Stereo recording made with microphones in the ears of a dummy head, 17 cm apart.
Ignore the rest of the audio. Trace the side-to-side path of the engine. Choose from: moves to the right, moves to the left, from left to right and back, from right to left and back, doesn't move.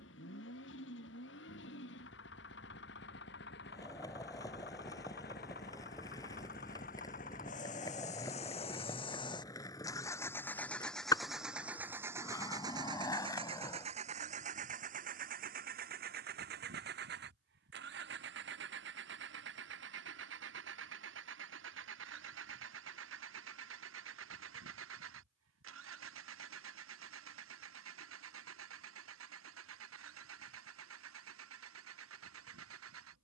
moves to the right.